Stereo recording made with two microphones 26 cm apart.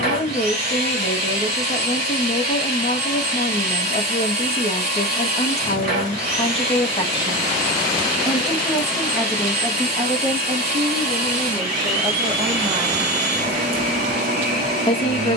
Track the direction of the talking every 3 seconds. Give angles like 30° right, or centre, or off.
20° left, 20° left, 10° left, 10° right, 10° right.